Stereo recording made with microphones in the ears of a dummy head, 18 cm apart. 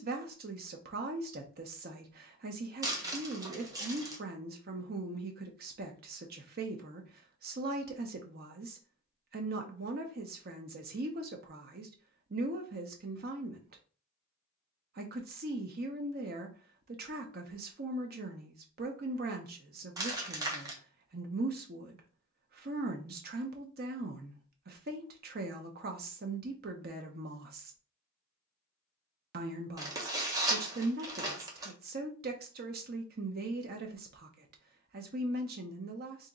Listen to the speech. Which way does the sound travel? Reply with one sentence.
You can hear the speech stay in one place.